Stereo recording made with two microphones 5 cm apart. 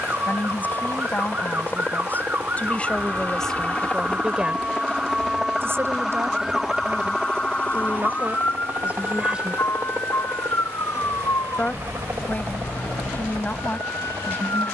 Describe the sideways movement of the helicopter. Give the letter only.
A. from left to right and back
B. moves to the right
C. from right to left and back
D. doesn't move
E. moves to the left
B.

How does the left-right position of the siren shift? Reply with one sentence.
In this clip you hear the siren move from right to left.